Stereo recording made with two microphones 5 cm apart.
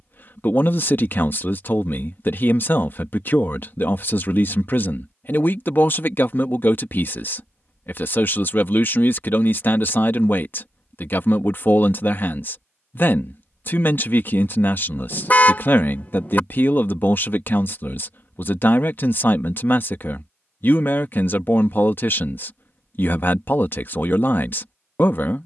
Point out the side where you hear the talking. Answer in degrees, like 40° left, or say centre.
50° left.